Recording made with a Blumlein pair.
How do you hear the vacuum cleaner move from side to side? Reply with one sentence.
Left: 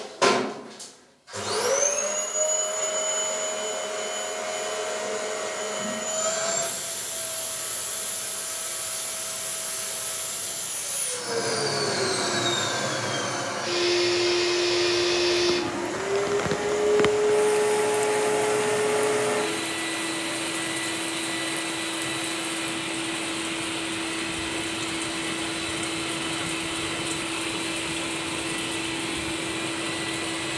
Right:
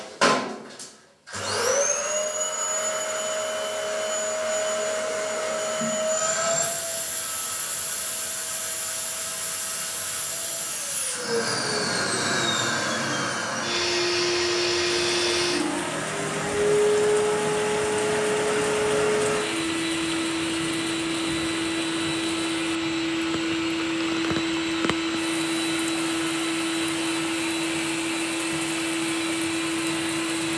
You can hear the vacuum cleaner stay put.